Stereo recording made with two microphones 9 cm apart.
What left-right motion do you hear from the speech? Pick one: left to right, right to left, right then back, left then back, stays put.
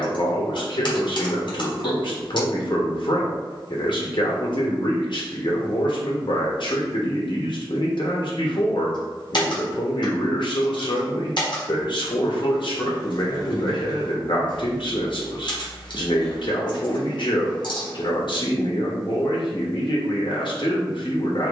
stays put.